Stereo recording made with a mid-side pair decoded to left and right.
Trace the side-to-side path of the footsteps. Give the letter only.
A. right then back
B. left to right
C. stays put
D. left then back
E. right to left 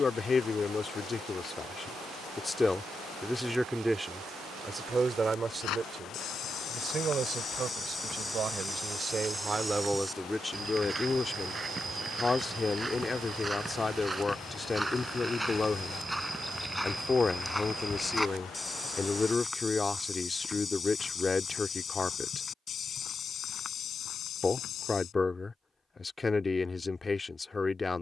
A.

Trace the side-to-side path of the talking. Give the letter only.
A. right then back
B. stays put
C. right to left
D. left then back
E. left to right
A.